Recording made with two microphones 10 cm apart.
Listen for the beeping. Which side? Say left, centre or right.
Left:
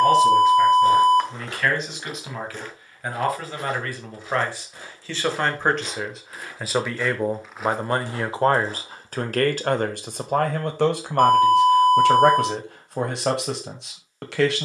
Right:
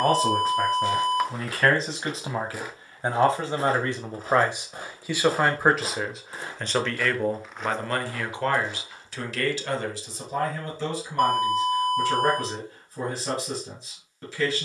centre.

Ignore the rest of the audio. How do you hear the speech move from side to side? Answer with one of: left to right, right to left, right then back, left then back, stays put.
right to left.